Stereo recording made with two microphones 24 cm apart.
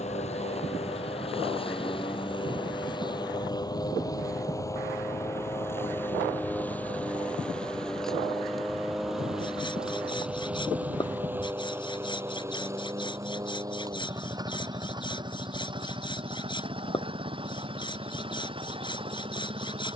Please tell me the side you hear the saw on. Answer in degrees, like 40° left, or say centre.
20° left.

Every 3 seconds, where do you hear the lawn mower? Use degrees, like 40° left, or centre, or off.
20° left, 10° left, centre, 10° right, 10° right, 20° right, 20° right.